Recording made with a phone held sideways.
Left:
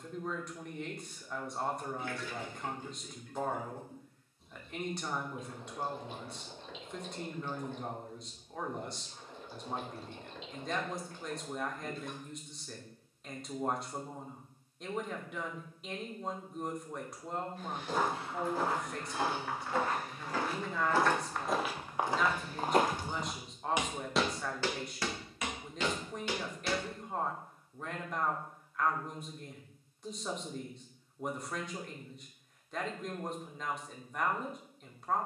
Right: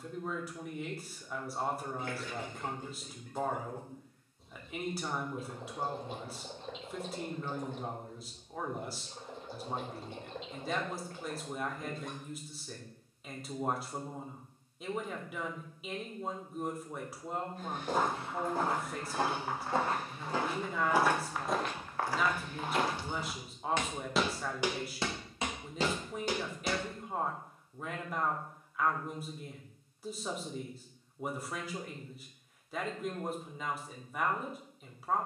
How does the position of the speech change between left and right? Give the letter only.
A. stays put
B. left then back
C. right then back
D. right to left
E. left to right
A.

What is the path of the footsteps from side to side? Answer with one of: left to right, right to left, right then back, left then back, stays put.
left then back.